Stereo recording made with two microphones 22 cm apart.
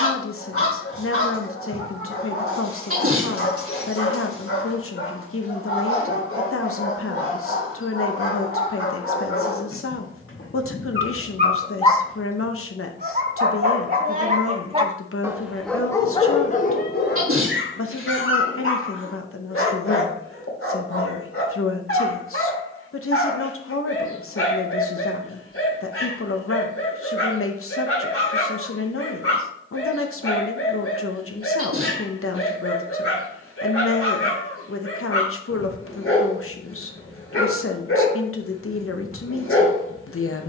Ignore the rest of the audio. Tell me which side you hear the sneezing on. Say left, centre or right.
right.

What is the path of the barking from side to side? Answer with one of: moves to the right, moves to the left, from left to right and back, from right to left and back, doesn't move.
from left to right and back.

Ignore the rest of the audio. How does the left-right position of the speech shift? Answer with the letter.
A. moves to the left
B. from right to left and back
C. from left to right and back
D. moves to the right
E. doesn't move
E.